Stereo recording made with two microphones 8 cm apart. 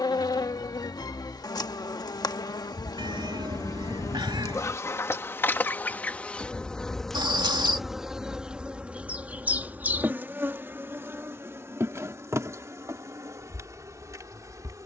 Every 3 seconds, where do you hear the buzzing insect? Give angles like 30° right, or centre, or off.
50° left, 40° left, centre, 30° right, 40° right.